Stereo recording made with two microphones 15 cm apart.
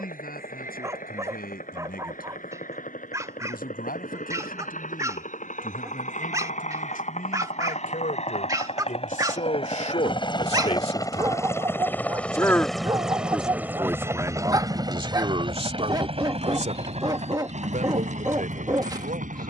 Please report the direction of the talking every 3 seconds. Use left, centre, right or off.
left, left, left, left, centre, right, right.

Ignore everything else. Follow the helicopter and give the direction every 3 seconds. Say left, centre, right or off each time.
left, left, left, left, centre, right, right.